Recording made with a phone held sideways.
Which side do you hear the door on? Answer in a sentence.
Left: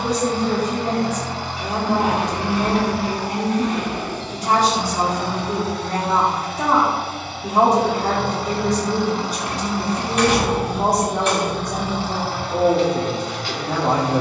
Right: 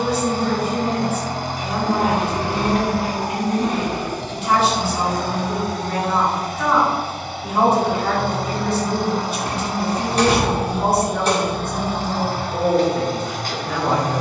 You can hear the door on the right.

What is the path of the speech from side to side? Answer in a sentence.
In this clip you hear the speech stay put.